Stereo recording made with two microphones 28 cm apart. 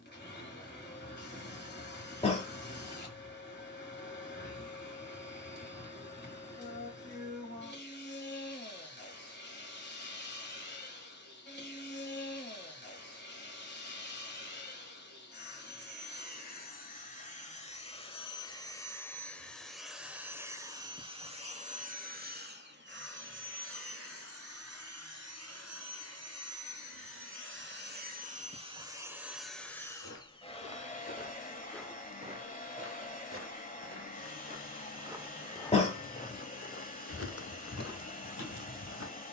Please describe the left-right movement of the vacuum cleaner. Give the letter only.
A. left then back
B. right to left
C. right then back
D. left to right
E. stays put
C.